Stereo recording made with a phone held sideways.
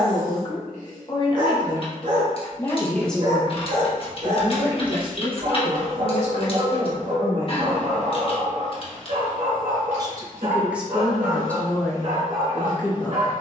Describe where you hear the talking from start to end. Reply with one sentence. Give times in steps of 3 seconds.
In this clip you hear the talking on the left from 0 s, on the right from 3 s, in the centre from 9 s and on the left from 12 s.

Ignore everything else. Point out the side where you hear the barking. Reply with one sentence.
In this clip you hear the barking on the right.